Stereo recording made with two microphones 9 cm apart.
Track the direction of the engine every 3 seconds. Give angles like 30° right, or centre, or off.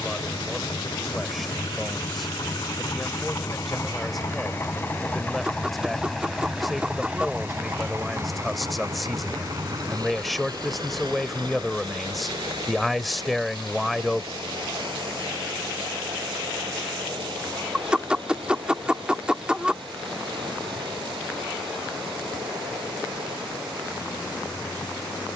60° left, 30° left, 20° right, 50° right, 70° right, 70° right, 80° right, 80° right, off.